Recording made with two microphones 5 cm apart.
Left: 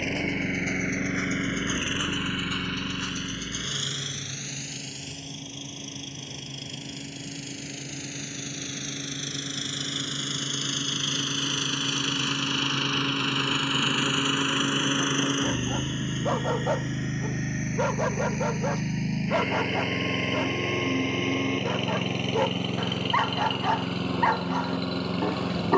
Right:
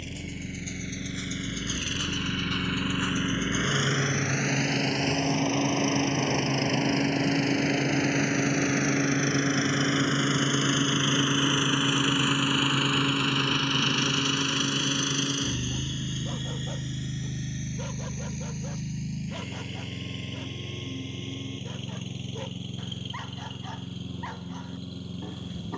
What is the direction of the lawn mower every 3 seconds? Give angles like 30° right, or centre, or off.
30° left, 50° right, 50° right, 30° right, centre, 40° left, 60° left, 70° left, 70° left.